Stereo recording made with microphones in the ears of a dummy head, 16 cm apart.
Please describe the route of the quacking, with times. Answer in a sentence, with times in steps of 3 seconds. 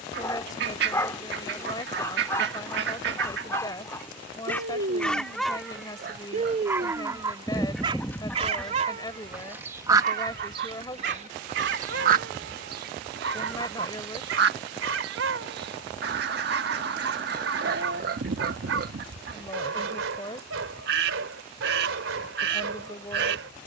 In this clip you hear the quacking on the right from 0 s, in the centre from 6 s and on the right from 9 s.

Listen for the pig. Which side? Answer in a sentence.
You can hear the pig on the right.